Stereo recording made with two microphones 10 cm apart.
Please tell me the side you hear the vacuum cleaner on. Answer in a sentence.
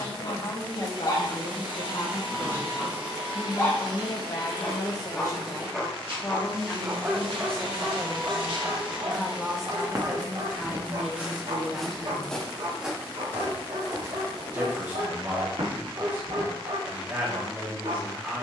You can hear the vacuum cleaner on the right.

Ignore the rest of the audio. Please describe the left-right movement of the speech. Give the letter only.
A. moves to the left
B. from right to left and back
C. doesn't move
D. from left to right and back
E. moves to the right
E.